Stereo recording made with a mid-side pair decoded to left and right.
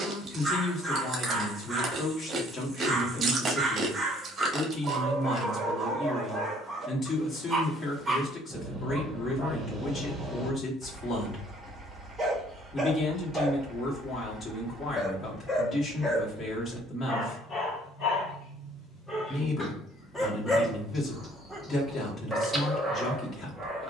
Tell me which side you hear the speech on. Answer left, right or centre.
left.